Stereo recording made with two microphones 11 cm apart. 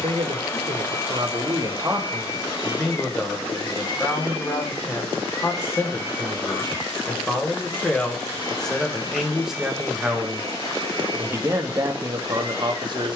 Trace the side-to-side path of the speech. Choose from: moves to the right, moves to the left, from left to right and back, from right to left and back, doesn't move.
from right to left and back.